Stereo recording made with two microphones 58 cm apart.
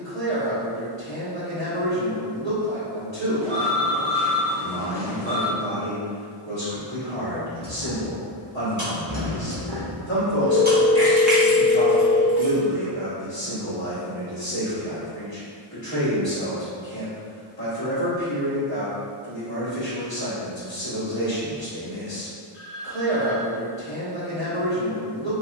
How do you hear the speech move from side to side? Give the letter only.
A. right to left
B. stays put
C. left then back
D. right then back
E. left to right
B.